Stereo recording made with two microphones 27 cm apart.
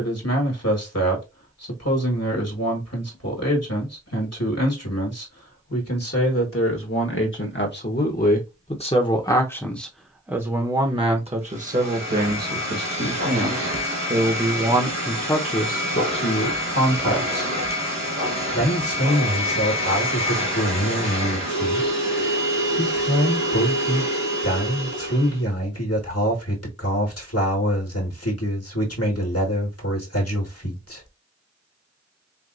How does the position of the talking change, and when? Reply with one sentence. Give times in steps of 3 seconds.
In this clip you hear the talking on the left from 0 s, in the centre from 9 s, on the right from 12 s and on the left from 15 s.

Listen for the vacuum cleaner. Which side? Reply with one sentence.
In this clip you hear the vacuum cleaner on the right.